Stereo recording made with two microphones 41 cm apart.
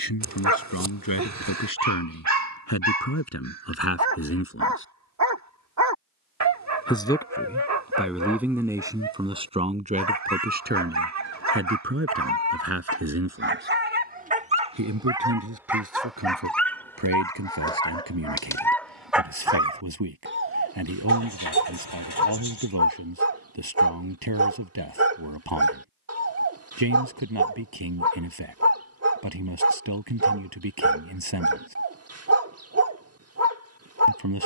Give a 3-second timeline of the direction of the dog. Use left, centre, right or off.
right, right, right, right, right, centre, centre, right, right, right, right, right.